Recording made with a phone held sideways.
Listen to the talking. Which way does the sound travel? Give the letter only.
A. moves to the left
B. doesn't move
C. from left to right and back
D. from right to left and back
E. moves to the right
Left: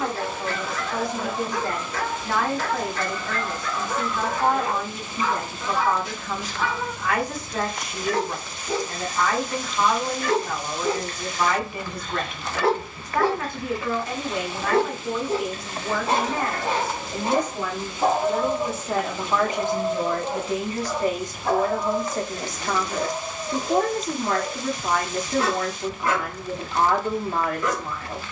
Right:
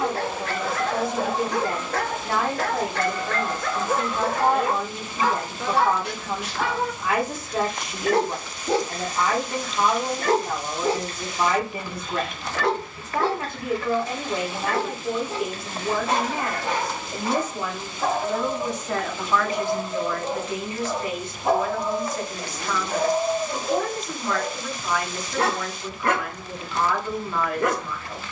A.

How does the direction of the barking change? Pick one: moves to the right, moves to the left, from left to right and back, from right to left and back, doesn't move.
from right to left and back.